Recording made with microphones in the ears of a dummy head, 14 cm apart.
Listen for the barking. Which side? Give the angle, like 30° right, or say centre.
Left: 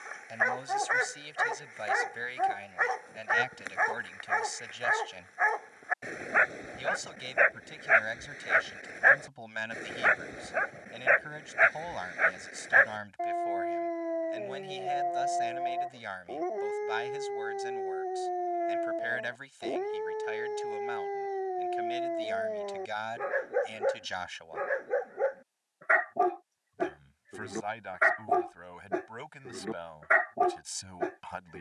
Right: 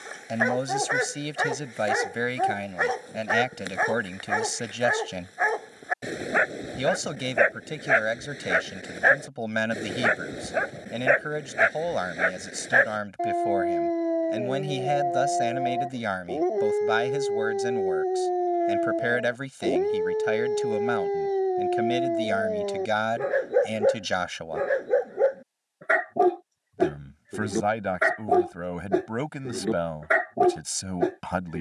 40° right.